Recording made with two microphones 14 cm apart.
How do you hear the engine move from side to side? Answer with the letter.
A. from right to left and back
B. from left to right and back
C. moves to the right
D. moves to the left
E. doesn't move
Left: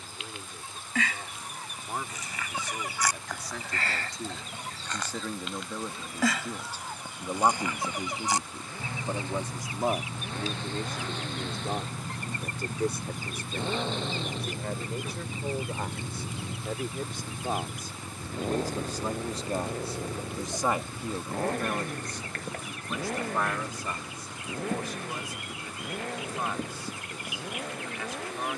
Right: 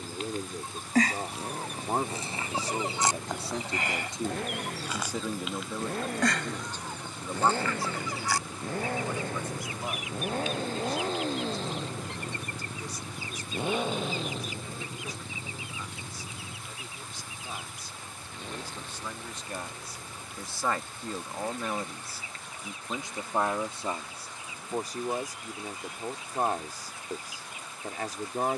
D.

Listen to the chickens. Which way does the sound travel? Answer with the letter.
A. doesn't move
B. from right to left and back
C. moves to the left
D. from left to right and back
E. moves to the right
C.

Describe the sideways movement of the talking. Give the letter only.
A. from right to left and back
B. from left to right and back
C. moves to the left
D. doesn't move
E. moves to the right
A.